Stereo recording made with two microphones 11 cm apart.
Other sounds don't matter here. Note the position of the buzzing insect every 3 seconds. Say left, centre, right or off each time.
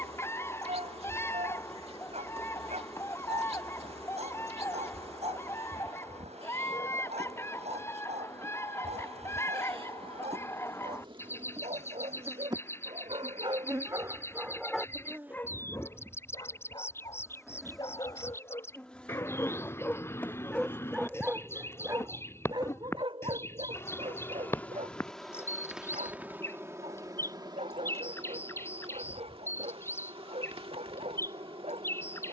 right, right, right, right, right, centre, centre, left, centre, right, right.